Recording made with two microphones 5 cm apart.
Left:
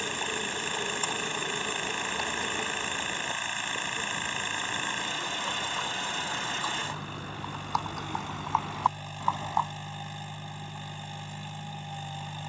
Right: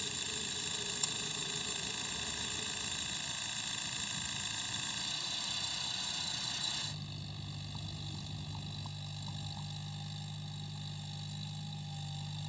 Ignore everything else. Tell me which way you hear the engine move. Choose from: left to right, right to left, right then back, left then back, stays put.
stays put.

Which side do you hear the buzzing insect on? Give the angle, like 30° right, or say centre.
70° left.